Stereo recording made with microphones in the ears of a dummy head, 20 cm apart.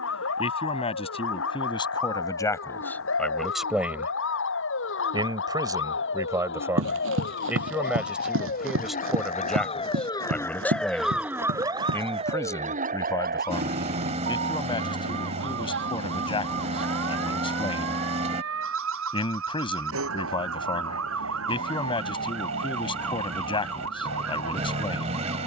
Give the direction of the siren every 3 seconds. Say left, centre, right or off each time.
left, left, left, centre, right, right, right, right, right.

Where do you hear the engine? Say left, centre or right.
right.